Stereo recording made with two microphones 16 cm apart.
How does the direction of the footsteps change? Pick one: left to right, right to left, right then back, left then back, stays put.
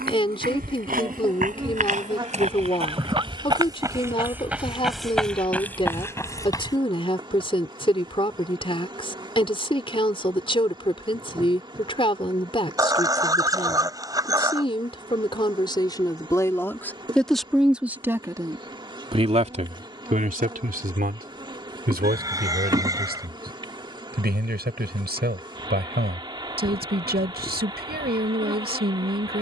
right to left.